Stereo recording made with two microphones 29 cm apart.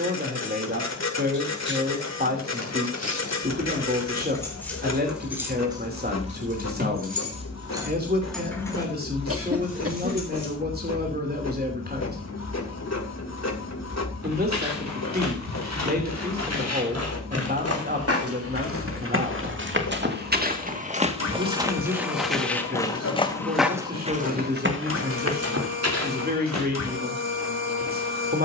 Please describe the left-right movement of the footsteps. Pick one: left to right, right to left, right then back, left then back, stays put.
left then back.